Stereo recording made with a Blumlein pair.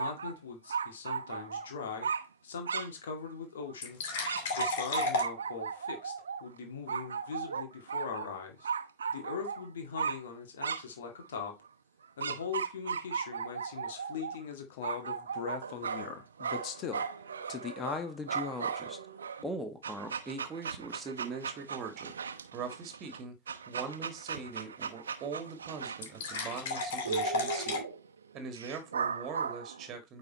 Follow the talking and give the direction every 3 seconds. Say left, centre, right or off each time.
left, left, left, left, left, left, centre, right, right, right.